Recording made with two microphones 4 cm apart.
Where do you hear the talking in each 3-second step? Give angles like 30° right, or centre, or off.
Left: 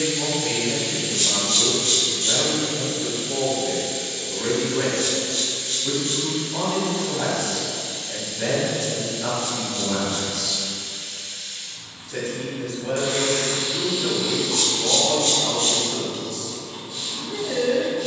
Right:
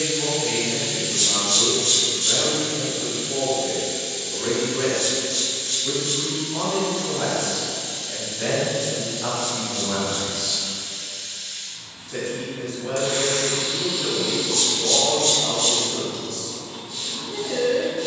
30° left, 30° left, 10° left, 10° right, 10° left, 20° left.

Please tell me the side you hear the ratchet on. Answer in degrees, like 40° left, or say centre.
40° left.